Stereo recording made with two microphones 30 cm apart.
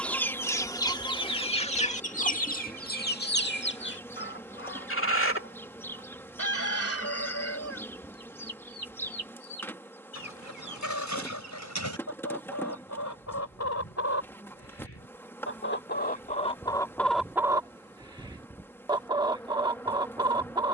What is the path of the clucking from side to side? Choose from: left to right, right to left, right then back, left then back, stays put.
left then back.